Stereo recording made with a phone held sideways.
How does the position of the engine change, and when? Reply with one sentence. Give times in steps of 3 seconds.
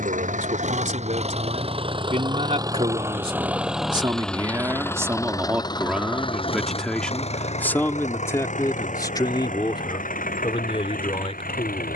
You can hear the engine on the right from 0 s, in the centre from 3 s and on the left from 6 s.